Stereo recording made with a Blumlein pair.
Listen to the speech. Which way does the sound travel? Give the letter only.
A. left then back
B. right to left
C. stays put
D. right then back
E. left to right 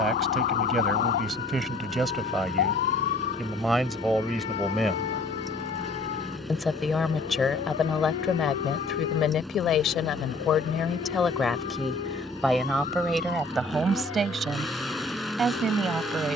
A.